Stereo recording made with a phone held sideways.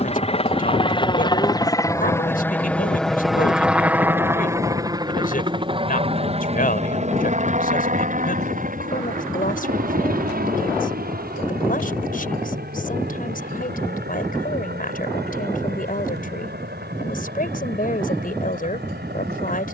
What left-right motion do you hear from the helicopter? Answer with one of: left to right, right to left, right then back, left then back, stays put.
left to right.